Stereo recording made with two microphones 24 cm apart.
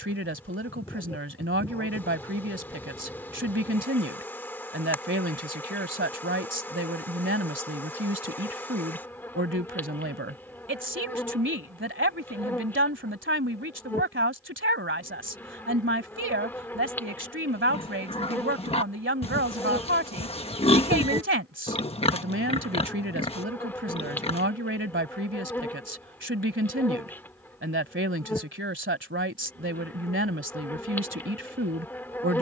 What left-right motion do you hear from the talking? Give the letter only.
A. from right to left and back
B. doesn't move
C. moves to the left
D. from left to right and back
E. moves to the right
B.